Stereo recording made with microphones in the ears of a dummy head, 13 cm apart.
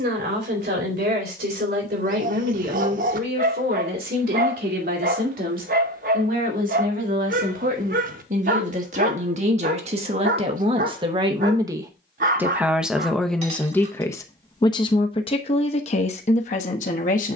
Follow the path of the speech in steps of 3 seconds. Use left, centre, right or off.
right, right, right, right, centre, left.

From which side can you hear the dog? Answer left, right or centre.
right.